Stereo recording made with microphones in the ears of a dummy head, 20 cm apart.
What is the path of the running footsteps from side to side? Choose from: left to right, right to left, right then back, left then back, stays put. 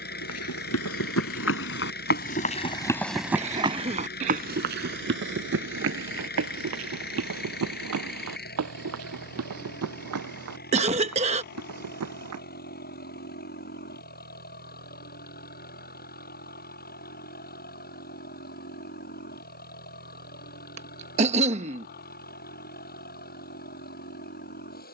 left to right.